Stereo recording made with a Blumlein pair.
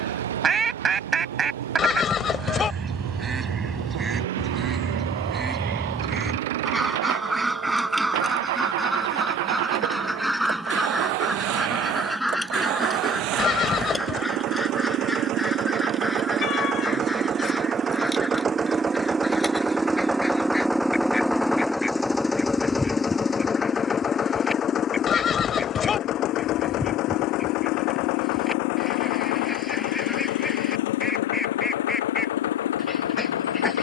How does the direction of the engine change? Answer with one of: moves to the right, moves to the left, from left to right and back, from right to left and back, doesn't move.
moves to the left.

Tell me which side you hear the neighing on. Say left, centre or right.
left.